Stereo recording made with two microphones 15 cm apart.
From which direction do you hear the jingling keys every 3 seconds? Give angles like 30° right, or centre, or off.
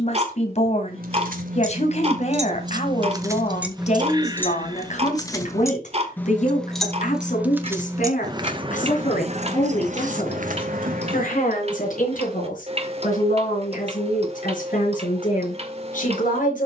60° right, 10° left, 10° right, 60° right, off, off.